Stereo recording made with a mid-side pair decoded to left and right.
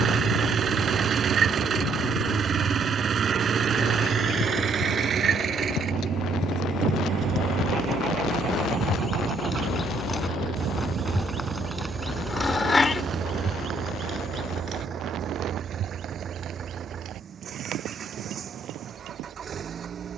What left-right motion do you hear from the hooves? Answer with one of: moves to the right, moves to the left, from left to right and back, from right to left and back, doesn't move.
moves to the right.